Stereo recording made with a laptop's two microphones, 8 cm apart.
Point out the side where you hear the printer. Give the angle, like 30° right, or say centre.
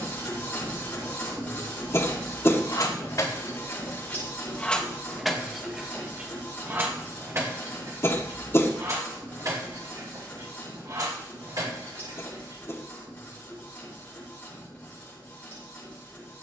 20° left.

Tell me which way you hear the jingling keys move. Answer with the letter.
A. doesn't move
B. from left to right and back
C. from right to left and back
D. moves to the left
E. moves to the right
E.